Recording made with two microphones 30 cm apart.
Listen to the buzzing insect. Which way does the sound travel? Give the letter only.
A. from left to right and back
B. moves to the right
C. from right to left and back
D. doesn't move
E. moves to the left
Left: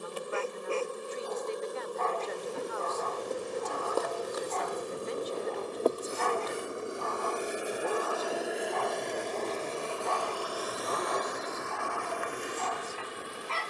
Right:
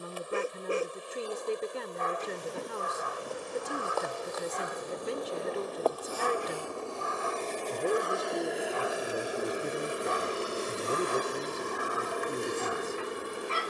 B.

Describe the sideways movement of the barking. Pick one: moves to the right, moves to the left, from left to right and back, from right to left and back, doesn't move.
doesn't move.